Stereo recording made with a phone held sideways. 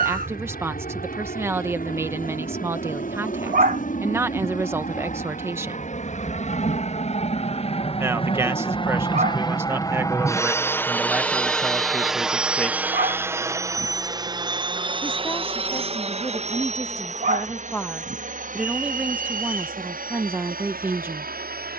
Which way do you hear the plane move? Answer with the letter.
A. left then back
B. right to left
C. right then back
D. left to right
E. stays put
D.